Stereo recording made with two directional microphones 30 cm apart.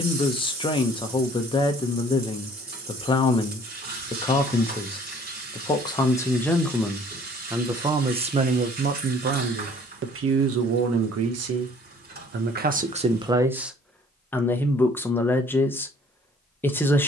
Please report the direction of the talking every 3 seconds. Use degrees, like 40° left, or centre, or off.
20° left, 20° left, 10° right, 40° right, 10° right, 10° left.